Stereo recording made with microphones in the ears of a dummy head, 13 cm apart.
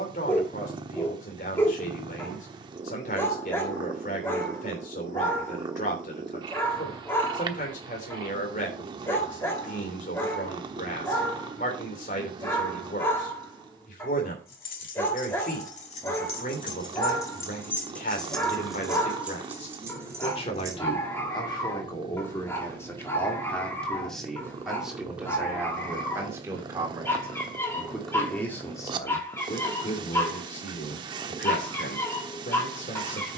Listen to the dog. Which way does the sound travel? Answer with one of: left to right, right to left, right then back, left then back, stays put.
stays put.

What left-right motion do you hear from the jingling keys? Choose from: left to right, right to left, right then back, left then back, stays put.
left to right.